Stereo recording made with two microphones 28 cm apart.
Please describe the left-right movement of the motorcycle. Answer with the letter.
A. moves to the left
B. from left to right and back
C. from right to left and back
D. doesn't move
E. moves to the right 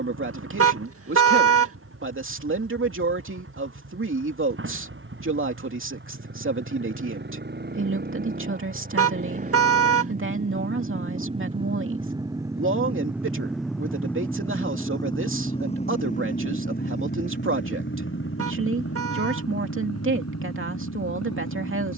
A.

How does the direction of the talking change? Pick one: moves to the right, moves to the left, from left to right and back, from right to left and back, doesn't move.
doesn't move.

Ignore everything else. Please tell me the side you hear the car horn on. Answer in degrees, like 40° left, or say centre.
50° right.